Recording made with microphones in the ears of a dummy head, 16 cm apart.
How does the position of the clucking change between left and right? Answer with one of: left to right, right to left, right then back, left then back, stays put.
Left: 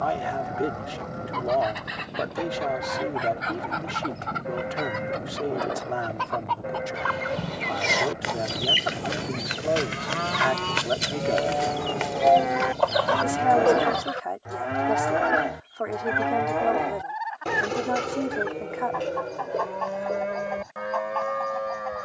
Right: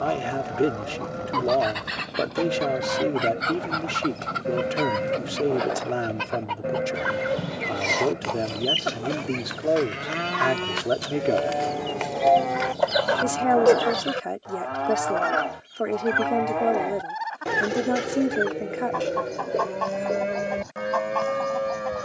left then back.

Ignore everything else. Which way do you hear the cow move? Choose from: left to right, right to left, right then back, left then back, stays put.
left then back.